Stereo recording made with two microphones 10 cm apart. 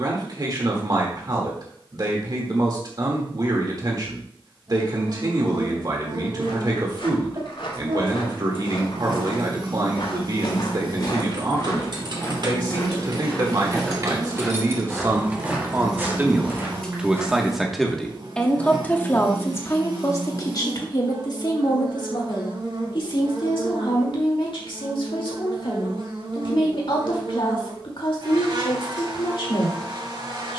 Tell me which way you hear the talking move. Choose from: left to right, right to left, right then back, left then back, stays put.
right to left.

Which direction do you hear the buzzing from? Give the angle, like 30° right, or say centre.
60° right.